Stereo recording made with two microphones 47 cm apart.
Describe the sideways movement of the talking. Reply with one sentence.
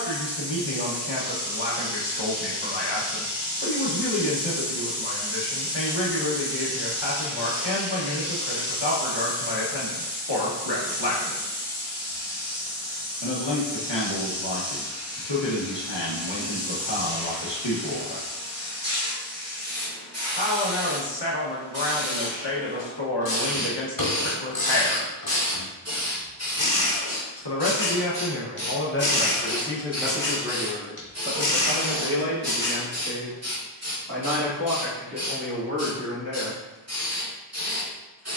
In this clip you hear the talking go from the left side to the right.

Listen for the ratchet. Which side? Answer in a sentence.
In this clip you hear the ratchet on the left.